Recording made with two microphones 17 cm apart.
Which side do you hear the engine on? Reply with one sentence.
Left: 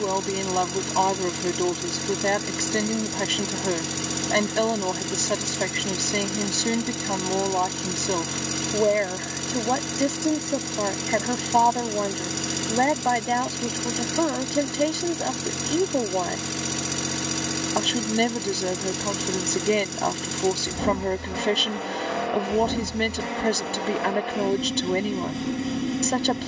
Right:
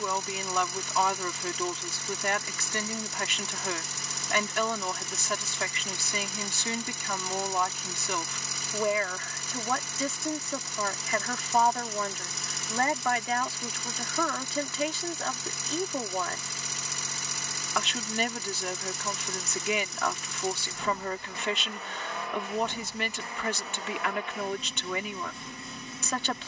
In this clip you hear the engine on the left.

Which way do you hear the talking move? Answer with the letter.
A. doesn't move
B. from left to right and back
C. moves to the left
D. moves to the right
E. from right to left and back
A.